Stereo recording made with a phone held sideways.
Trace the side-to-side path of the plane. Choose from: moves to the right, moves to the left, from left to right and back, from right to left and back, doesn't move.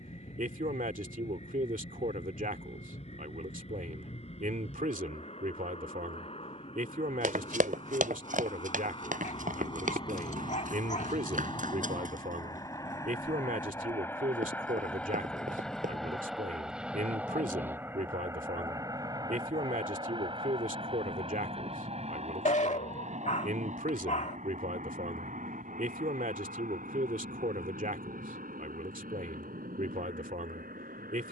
moves to the right.